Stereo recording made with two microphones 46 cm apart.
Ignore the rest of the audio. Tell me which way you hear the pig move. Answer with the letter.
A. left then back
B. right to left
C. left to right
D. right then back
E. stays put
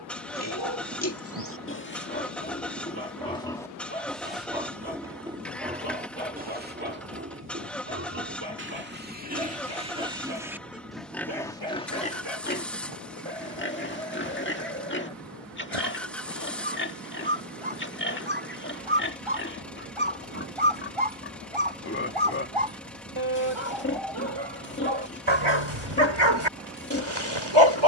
D.